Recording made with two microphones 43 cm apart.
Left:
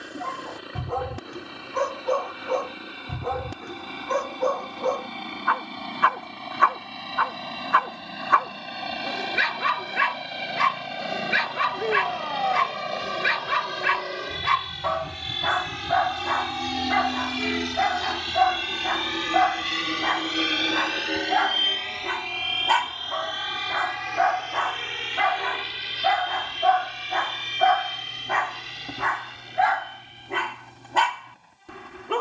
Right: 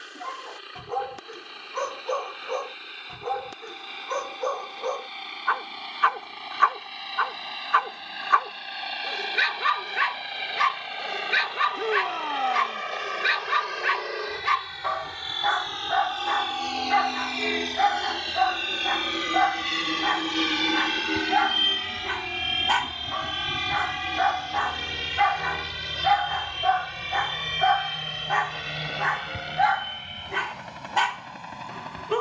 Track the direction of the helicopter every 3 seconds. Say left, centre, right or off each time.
left, left, left, left, left, left, centre, right, right, right, right.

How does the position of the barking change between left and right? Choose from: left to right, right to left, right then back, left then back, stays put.
stays put.